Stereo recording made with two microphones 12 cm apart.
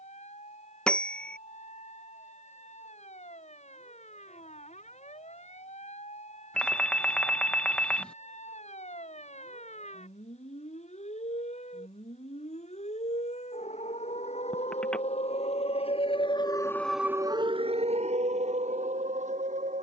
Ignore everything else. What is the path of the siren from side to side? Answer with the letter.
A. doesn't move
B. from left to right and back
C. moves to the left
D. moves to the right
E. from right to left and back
D.